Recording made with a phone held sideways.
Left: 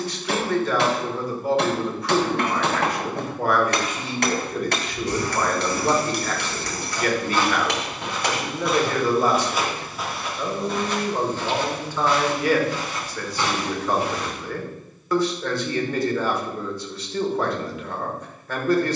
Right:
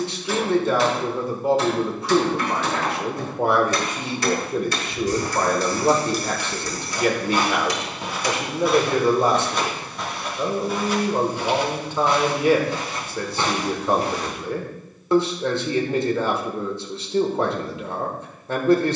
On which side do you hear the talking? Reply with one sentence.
You can hear the talking on the right.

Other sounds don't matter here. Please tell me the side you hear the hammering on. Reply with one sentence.
You can hear the hammering on the left.